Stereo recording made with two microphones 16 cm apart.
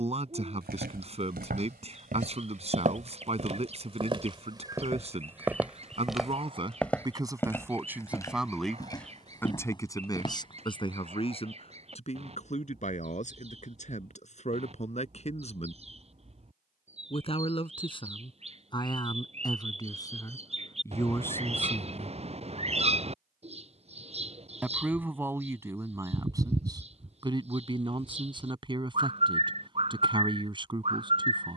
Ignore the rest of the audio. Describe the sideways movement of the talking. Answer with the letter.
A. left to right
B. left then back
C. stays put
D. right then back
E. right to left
B.